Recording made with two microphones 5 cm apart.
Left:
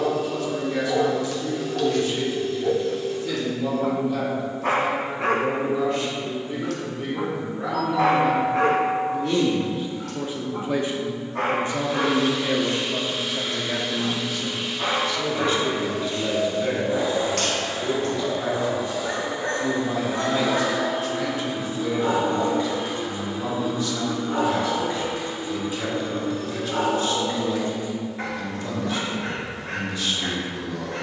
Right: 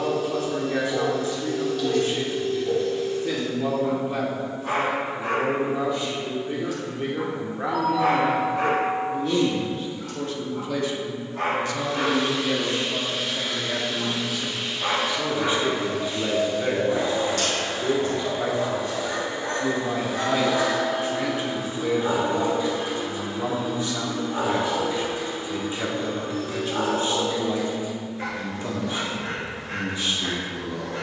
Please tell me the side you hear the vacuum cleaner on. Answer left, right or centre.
right.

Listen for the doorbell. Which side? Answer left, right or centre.
right.